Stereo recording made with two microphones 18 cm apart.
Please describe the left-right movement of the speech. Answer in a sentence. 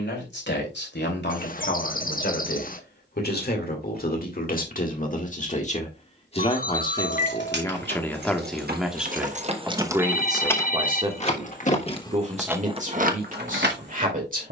You can hear the speech move to the right.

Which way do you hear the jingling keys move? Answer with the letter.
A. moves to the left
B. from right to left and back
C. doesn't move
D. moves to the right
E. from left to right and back
B.